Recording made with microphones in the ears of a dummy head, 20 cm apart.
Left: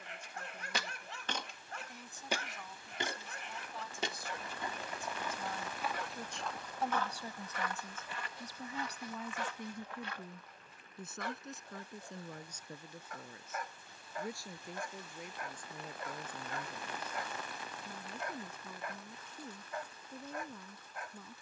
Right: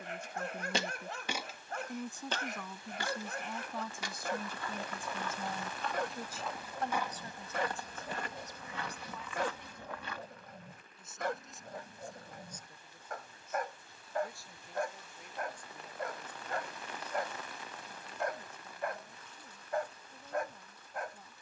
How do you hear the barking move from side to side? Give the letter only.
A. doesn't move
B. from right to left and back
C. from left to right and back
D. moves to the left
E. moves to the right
A.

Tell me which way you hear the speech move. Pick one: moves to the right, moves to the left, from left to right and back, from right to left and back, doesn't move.
moves to the left.